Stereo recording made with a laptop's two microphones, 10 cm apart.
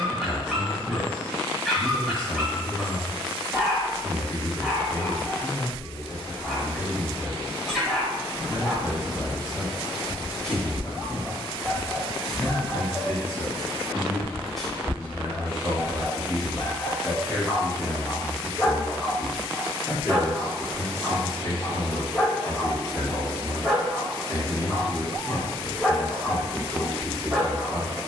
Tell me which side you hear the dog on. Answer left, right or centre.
centre.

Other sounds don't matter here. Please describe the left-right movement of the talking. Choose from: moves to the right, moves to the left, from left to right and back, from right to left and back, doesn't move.
from left to right and back.